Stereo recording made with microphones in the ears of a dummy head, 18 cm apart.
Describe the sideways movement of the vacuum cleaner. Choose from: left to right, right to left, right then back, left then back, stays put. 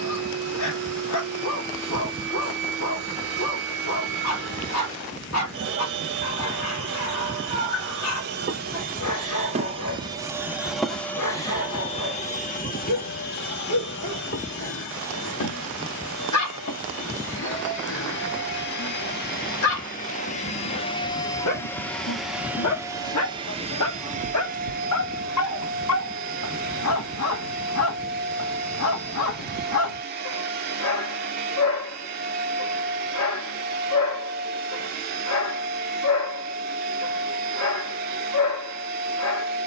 left then back.